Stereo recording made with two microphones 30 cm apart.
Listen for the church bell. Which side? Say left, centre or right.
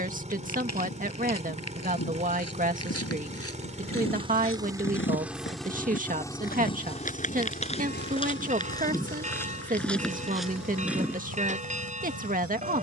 right.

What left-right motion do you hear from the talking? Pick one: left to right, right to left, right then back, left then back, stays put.
stays put.